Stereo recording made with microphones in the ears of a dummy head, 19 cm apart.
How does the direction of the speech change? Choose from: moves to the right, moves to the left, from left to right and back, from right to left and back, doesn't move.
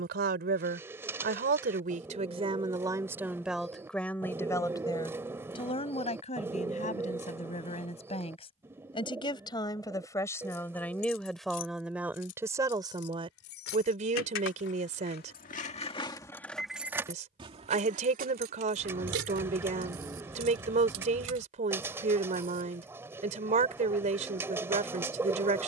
from right to left and back.